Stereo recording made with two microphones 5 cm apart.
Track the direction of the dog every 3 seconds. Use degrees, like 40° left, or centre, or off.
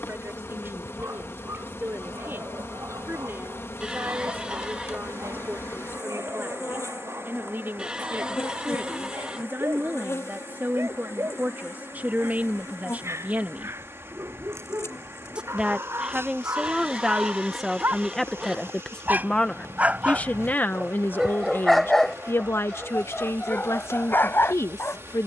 80° right, 80° right, 70° right, 70° right, 70° right, 60° right, 30° right, 10° left, 40° left.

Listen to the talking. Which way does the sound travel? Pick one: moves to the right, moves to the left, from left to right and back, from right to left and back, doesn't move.
moves to the left.